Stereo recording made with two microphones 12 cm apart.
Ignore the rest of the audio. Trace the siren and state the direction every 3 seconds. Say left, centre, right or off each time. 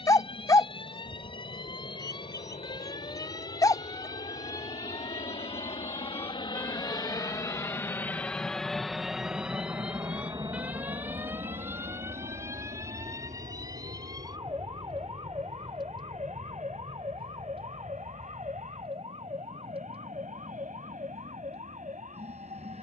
left, left, centre, centre, right, right, right, right.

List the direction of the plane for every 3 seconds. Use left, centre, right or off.
left, left, left, right, right, right, right, right.